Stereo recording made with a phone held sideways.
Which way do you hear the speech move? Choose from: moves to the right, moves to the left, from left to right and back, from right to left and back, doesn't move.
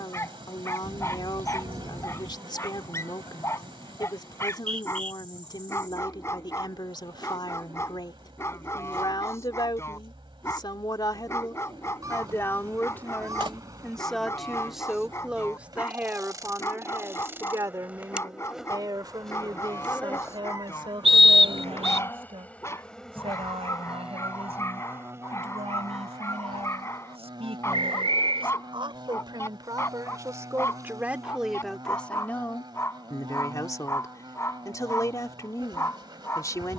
from left to right and back.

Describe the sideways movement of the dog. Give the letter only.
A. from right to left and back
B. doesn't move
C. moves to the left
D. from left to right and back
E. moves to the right
B.